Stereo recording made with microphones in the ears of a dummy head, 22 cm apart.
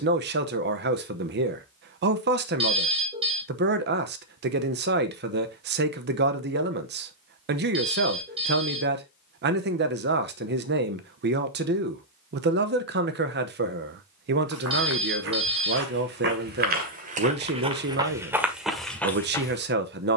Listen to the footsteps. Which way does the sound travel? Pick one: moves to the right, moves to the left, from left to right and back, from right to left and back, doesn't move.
moves to the left.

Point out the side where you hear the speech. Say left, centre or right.
right.